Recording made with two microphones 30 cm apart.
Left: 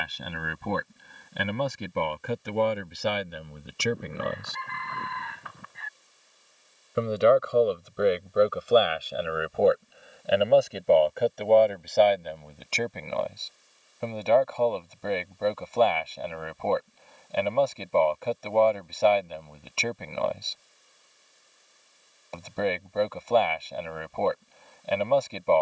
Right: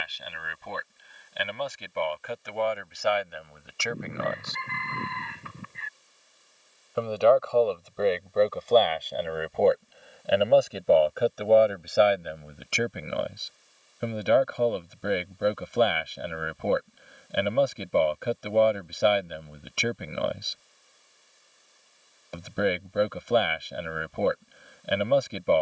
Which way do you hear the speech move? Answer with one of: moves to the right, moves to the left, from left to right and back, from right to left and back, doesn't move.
moves to the right.